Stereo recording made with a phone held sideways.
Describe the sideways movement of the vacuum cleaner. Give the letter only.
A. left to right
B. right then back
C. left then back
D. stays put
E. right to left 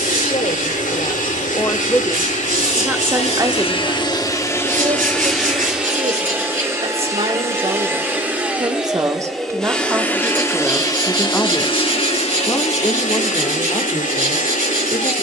B.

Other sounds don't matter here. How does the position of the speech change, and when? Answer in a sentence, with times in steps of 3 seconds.
In this clip you hear the speech on the left from 0 s, on the right from 3 s, in the centre from 9 s and on the left from 12 s.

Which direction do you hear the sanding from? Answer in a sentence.
In this clip you hear the sanding on the right.